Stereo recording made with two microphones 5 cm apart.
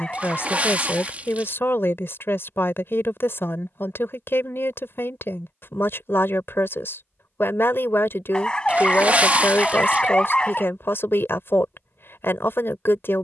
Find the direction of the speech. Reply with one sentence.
You can hear the speech on the left.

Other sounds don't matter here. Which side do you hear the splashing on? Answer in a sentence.
In this clip you hear the splashing on the right.